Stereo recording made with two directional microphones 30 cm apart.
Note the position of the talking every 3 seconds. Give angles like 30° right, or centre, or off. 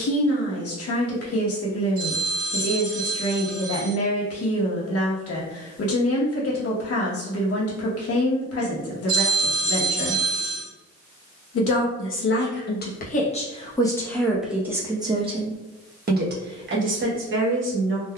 50° left, 50° left, 50° left, 50° left, 20° left, 30° right.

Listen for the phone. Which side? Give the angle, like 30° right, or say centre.
50° right.